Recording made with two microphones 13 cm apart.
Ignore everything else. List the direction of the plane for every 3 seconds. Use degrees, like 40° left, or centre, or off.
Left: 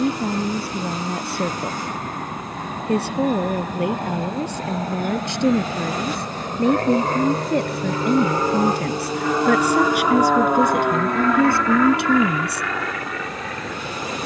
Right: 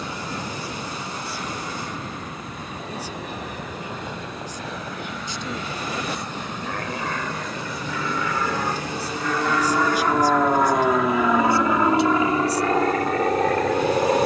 60° left, 60° left, 40° left, centre, 40° right.